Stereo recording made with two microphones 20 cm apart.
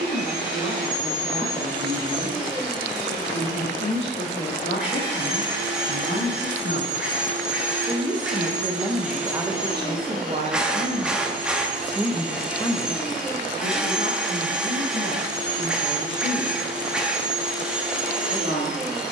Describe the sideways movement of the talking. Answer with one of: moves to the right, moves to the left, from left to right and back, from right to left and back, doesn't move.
from left to right and back.